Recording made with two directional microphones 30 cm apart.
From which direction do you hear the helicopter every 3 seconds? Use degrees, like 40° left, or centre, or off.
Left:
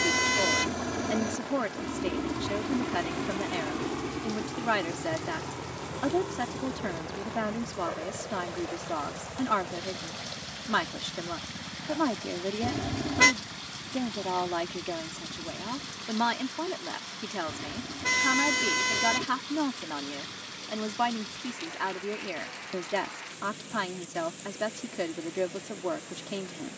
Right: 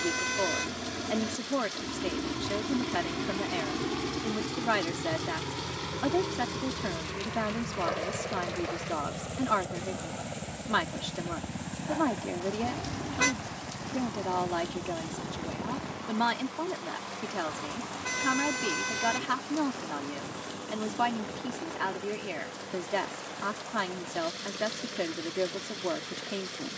30° left, 10° right, 30° right, 40° right, 40° right, 50° right, 50° right, 50° right, 50° right.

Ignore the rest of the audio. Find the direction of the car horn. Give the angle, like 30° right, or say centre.
40° left.